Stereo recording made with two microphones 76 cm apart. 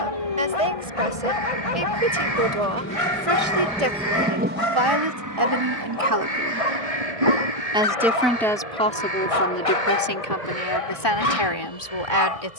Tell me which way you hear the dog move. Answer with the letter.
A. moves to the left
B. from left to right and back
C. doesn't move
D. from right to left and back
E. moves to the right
C.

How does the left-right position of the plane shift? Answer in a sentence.
You can hear the plane go from the left side to the right.